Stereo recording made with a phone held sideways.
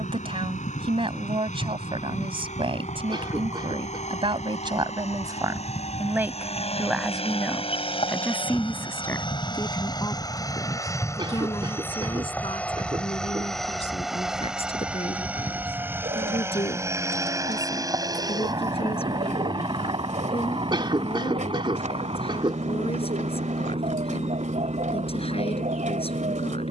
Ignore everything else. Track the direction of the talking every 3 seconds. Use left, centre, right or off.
right, right, centre, left, left, left, left, left, left.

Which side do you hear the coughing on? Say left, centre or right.
right.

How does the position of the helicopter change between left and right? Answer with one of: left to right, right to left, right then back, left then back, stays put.
left to right.